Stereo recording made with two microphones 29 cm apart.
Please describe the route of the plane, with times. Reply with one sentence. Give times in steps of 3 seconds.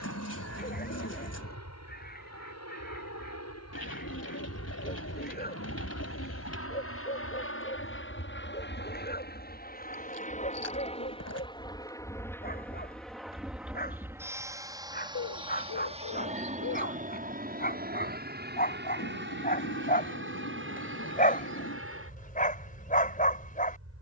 In this clip you hear the plane on the left from 0 s, in the centre from 12 s and on the right from 15 s.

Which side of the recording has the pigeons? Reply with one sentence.
In this clip you hear the pigeons on the left.